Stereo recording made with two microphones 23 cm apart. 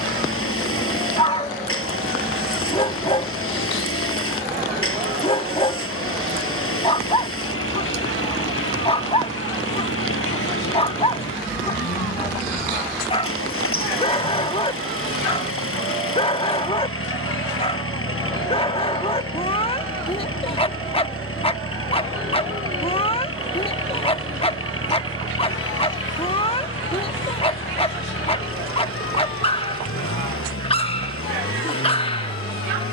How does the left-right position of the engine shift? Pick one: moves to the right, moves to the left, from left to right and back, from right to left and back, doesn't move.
doesn't move.